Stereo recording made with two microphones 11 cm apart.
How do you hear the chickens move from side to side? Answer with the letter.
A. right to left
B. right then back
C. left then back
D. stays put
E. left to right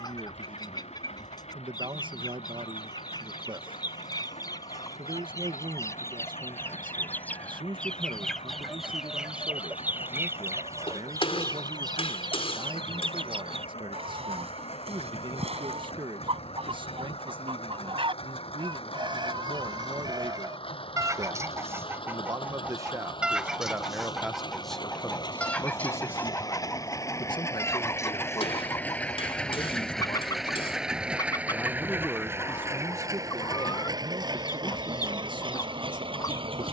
B.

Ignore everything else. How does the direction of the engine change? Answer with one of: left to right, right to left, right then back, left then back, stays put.
left to right.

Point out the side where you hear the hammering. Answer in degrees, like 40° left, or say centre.
60° left.